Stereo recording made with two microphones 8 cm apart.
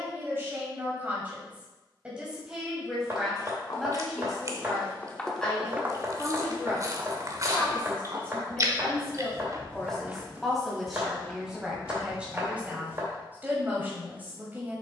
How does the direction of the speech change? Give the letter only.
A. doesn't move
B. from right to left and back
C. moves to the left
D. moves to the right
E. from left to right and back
B.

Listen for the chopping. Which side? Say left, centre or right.
right.